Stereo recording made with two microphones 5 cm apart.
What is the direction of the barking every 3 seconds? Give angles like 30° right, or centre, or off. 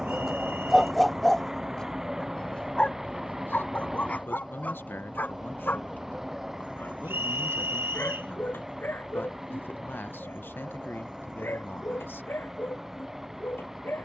10° left, 30° left, 50° left, 50° left, 60° left.